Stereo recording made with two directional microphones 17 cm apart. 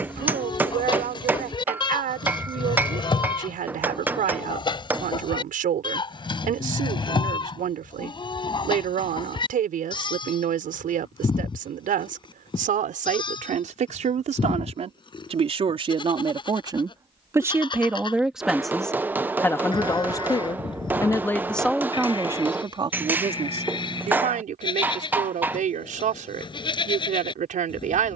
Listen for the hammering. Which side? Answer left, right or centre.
centre.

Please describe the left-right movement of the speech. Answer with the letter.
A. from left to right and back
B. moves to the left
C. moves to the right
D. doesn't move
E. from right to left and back
E.